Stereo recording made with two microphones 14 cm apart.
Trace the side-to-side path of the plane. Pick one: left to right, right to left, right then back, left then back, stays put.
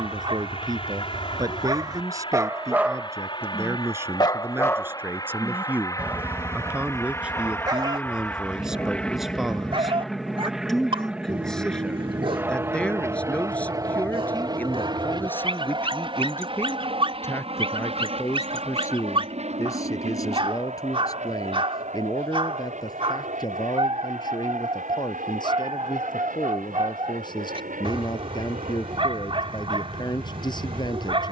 left to right.